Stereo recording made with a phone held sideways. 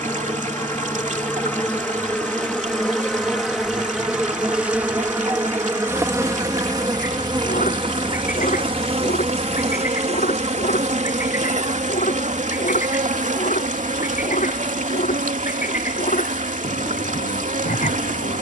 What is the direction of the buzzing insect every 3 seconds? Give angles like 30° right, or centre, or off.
10° left, 10° right, 30° right, 50° right, 60° right, 70° right.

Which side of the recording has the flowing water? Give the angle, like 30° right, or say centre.
60° right.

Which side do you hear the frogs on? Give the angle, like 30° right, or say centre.
70° left.